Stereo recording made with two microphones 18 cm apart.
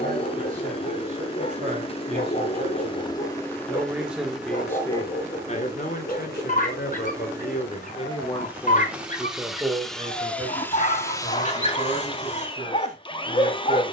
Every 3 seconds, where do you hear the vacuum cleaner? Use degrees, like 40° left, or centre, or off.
30° left, centre, 10° right, 10° left, 30° left.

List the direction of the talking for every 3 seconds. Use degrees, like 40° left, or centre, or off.
40° right, 20° left, 40° left, 30° right, 40° right.